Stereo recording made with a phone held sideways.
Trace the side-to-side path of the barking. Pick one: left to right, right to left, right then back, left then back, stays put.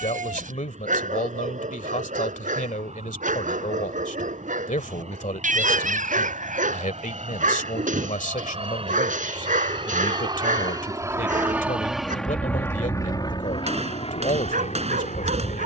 stays put.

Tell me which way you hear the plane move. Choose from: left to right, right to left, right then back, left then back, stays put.
right to left.